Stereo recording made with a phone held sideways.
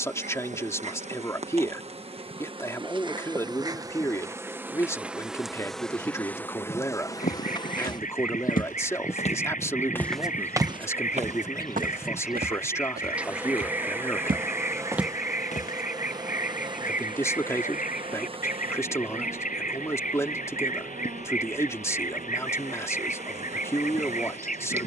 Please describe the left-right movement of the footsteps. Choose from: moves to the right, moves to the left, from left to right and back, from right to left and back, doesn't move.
from left to right and back.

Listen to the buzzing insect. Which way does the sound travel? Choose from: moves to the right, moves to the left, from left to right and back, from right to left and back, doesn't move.
from right to left and back.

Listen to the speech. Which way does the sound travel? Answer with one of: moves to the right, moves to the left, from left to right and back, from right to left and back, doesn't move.
doesn't move.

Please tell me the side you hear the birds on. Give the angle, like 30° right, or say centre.
50° left.